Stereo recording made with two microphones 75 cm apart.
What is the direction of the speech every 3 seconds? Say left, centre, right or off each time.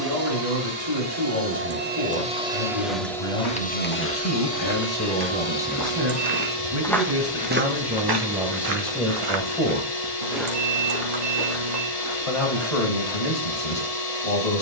left, left, centre, centre, left.